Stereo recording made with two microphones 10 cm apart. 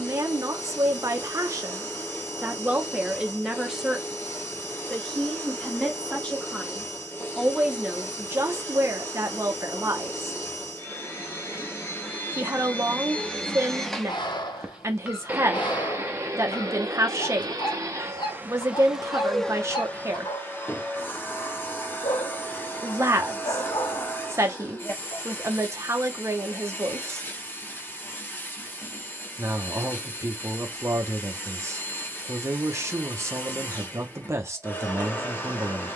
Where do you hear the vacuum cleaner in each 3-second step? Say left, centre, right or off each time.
left, left, left, left, centre, right, centre, left, left, left, left, left.